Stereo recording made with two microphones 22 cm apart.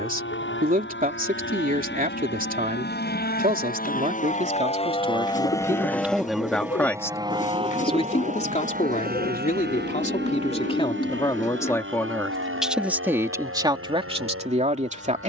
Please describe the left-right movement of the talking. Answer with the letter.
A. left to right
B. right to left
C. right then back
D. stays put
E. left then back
E.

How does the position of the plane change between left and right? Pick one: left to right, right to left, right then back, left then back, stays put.
left to right.